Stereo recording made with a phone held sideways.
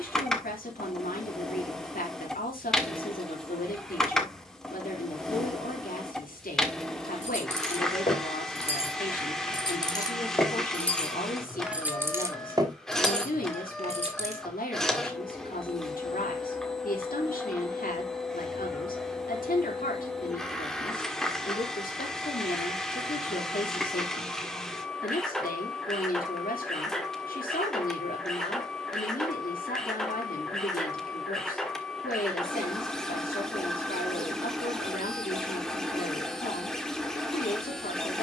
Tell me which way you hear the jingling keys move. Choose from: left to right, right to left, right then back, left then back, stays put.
left to right.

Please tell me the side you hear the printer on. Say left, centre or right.
centre.